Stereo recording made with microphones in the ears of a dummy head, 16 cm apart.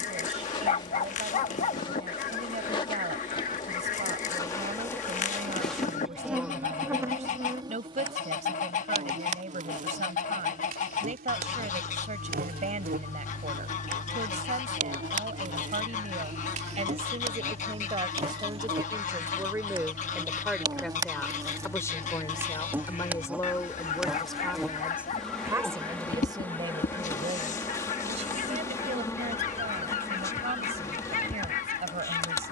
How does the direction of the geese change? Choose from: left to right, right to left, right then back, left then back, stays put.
stays put.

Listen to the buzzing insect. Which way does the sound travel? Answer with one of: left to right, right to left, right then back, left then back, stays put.
right then back.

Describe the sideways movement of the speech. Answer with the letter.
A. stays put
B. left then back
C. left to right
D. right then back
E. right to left
B.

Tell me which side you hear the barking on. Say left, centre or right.
left.